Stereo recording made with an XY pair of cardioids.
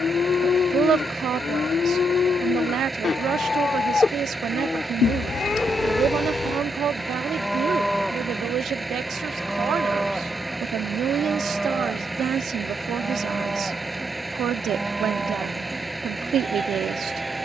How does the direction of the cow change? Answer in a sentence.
You can hear the cow move to the right.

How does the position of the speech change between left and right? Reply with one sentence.
In this clip you hear the speech stay put.